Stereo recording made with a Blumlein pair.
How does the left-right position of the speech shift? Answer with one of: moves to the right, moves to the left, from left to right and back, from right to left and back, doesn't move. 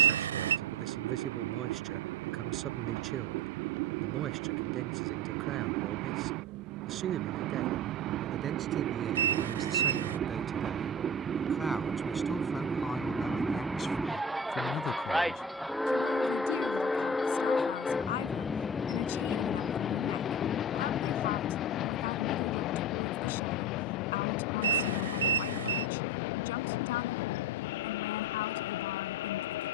moves to the left.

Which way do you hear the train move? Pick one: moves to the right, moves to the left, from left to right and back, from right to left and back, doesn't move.
moves to the left.